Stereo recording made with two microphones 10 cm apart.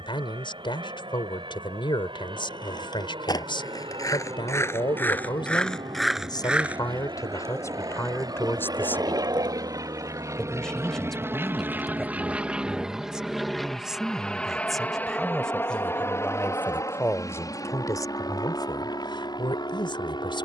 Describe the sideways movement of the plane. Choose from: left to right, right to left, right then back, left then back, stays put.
right to left.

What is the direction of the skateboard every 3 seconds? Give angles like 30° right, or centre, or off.
50° left, 30° left, 30° right, 50° right, off, off, off.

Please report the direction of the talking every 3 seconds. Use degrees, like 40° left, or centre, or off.
60° left, 60° left, 40° left, 10° left, centre, 20° left, 60° left.